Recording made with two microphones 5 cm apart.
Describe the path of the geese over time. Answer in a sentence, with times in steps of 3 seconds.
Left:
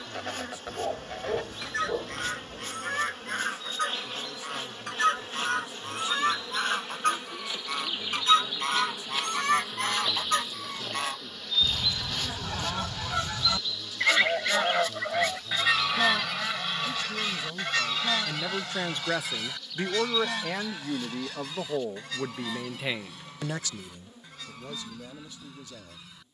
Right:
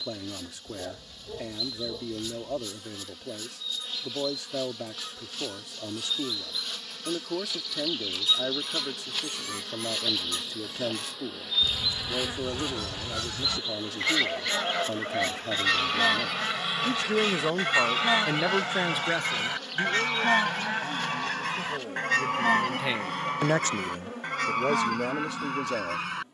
In this clip you hear the geese on the left from 0 s, in the centre from 15 s and on the right from 18 s.